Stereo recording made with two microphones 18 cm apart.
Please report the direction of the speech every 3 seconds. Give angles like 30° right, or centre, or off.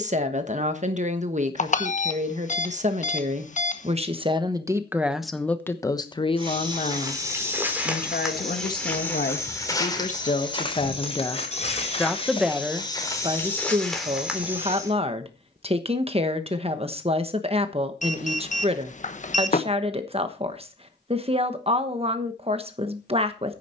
40° right, 20° right, 40° left, 40° left, 20° right, 30° right, 30° right, 30° right.